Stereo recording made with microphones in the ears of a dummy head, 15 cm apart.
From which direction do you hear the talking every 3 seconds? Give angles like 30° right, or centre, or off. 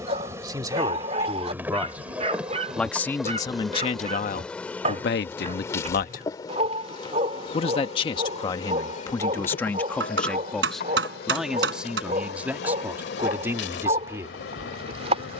10° right, 40° left, 30° left, 10° left, 10° right.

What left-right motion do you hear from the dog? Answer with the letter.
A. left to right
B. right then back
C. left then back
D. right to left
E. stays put
E.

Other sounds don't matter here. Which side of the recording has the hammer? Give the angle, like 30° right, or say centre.
80° right.